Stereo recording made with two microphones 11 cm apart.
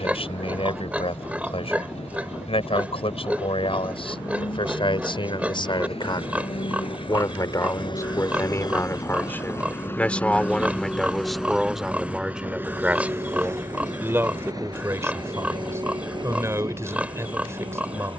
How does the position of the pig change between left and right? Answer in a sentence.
In this clip you hear the pig stay in one place.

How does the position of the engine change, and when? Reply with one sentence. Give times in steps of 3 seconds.
You can hear the engine on the left from 0 s, in the centre from 9 s and on the right from 12 s.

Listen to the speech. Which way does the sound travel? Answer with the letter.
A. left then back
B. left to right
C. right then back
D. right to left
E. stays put
B.